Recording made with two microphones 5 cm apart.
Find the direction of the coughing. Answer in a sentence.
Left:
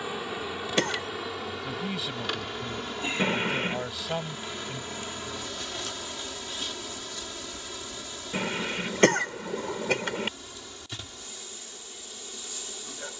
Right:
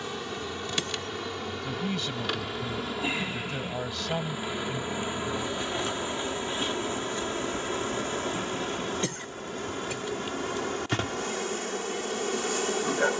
In this clip you hear the coughing on the left.